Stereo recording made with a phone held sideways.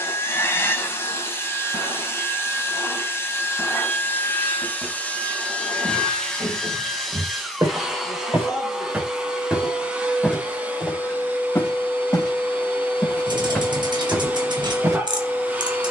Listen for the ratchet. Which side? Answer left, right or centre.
right.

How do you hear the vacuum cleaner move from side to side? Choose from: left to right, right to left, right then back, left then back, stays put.
left to right.